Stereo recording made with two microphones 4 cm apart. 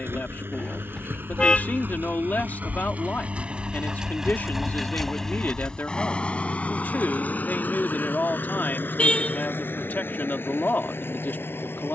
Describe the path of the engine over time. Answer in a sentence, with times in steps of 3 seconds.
In this clip you hear the engine on the right from 0 s, in the centre from 3 s and on the left from 6 s.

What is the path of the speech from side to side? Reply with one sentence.
You can hear the speech stay in one place.